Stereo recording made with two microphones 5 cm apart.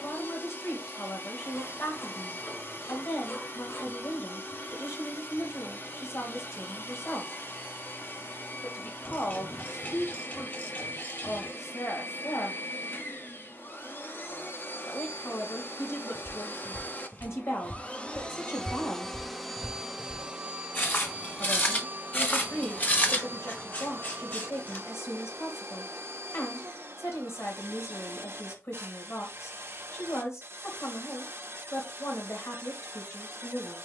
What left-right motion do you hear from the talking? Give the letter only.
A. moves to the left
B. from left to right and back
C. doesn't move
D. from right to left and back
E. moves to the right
C.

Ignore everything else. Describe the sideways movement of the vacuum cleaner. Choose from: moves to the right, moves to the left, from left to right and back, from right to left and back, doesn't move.
moves to the right.